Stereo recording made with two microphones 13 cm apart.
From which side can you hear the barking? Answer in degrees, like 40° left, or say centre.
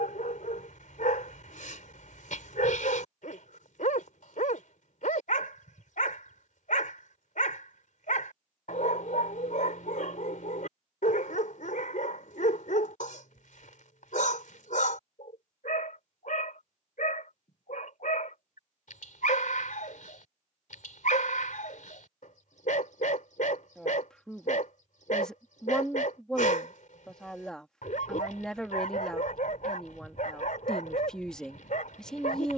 70° left.